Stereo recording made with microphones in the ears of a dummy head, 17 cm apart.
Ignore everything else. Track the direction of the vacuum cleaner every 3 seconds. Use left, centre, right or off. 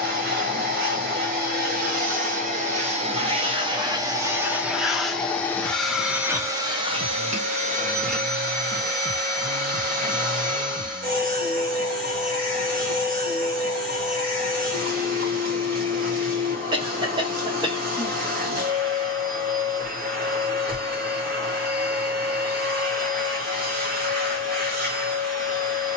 right, centre, right, right, right, right, right, right, right.